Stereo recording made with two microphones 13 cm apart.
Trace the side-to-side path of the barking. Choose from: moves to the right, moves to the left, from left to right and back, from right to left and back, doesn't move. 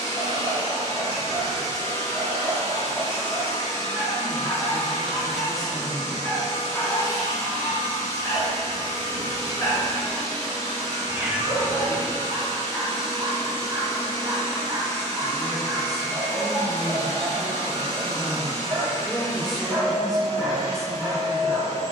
from right to left and back.